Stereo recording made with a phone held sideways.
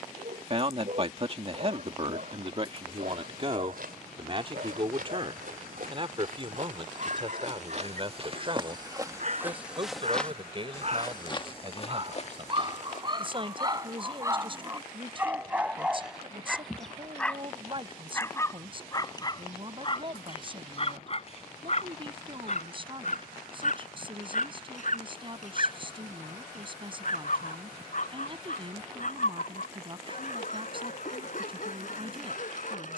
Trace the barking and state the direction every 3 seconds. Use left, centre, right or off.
right, right, right, right, right, centre, left, left, left, left, left.